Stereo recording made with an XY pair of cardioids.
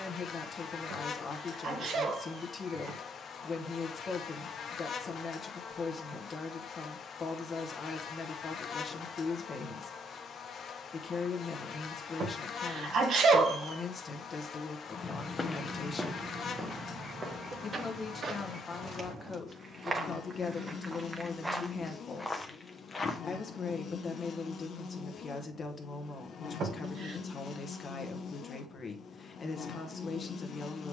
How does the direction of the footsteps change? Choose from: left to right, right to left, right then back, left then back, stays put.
right then back.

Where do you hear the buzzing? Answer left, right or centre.
left.